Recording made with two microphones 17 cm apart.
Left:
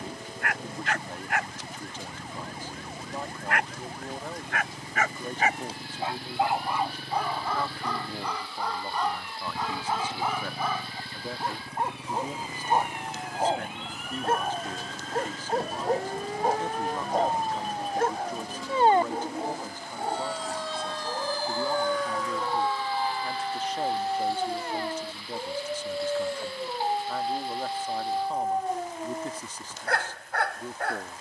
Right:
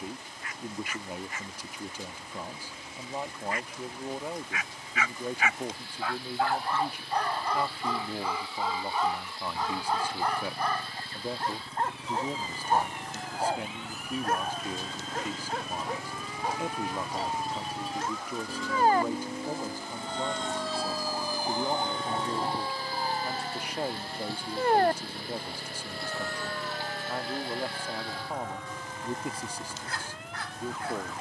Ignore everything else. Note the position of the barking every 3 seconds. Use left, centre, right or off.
left, left, centre, centre, left, left, left, left, left, left, left.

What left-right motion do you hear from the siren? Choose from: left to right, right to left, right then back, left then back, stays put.
left to right.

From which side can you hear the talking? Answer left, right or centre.
centre.